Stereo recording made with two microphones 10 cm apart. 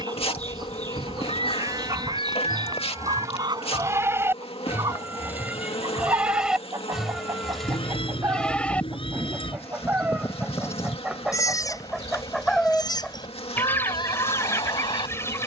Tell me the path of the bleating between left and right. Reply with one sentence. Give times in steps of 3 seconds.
In this clip you hear the bleating on the right from 0 s, in the centre from 6 s and on the left from 9 s.